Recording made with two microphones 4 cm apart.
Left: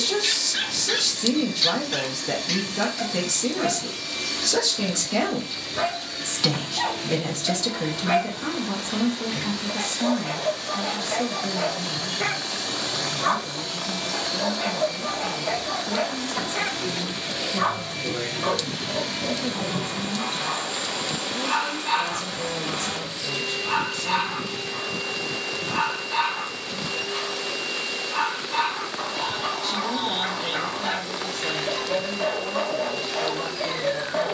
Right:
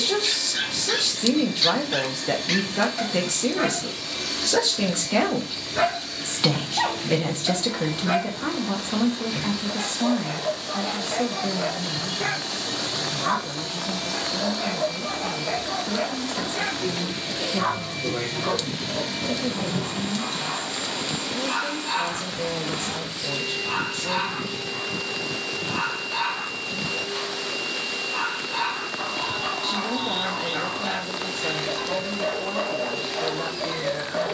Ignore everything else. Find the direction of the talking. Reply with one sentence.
You can hear the talking on the right.